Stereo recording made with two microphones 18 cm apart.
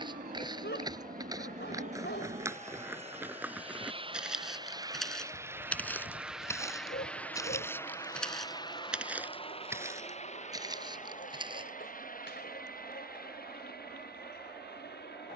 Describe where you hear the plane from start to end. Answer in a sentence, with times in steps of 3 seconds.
You can hear the plane on the right from 0 s, in the centre from 6 s and on the left from 9 s.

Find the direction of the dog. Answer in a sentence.
In this clip you hear the dog on the left.